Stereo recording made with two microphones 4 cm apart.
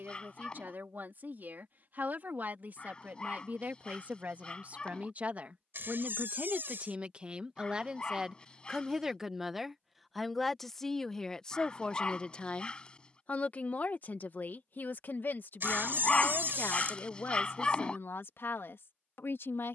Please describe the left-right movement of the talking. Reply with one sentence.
In this clip you hear the talking move to the left.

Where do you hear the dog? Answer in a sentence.
In this clip you hear the dog on the left.